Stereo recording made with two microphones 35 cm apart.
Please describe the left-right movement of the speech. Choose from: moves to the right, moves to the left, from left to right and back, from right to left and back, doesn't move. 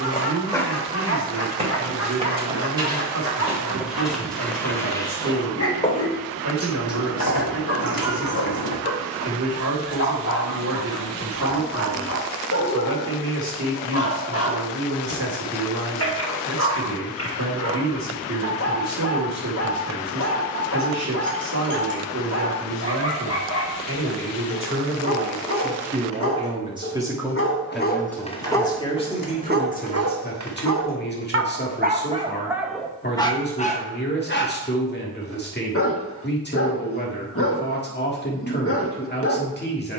moves to the left.